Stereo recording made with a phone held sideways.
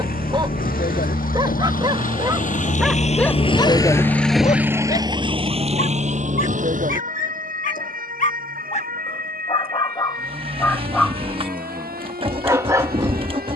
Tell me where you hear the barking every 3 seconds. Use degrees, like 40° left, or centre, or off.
20° right, 40° left, 60° left, 10° left, 20° right.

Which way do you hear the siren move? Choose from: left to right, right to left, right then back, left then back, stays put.
left to right.